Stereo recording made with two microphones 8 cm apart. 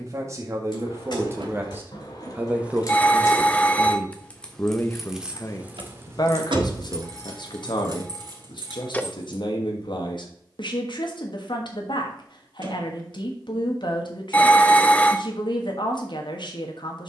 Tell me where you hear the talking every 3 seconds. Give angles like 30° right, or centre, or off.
30° right, 20° left, 60° left, 70° left, 70° left, 70° left.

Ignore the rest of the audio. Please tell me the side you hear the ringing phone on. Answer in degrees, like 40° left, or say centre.
20° left.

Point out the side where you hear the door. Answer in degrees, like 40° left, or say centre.
70° right.